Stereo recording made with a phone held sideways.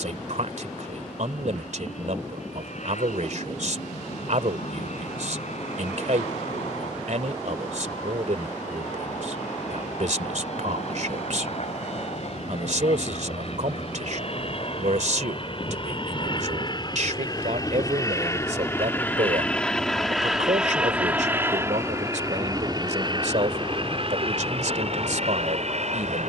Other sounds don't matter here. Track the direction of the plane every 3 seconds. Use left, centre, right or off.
left, left, left, left, left, left, centre, right, right.